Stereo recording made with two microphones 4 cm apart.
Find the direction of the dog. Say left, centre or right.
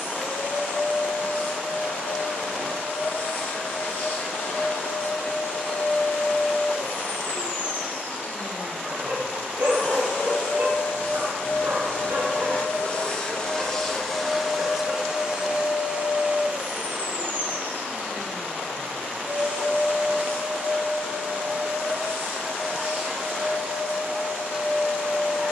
right.